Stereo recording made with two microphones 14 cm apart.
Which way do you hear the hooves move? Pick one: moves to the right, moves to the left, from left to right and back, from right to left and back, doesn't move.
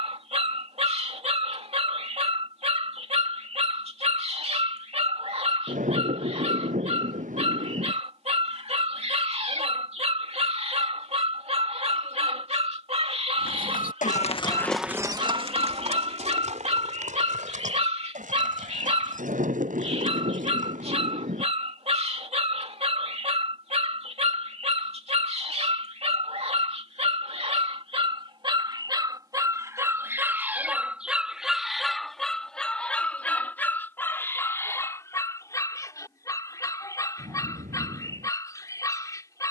moves to the right.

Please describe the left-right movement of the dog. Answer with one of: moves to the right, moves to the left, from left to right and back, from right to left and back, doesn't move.
moves to the left.